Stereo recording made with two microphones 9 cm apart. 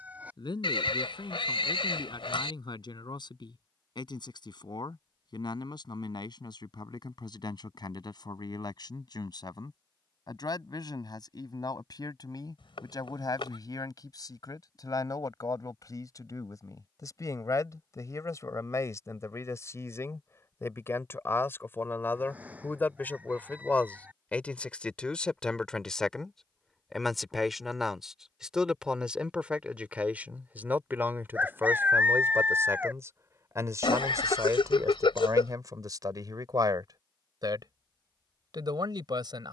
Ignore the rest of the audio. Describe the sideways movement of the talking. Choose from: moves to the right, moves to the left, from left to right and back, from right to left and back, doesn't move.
moves to the right.